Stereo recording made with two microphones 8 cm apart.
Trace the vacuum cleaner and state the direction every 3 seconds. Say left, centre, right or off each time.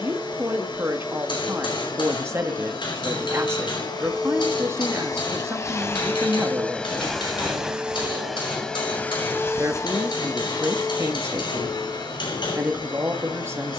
left, left, centre, left, left.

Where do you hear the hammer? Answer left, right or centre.
left.